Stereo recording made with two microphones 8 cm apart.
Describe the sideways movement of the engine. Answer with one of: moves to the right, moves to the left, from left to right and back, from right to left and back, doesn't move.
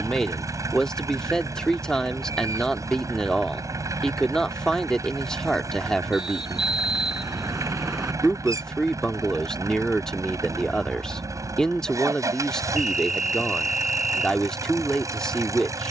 doesn't move.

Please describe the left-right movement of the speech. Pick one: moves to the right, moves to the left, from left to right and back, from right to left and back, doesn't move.
doesn't move.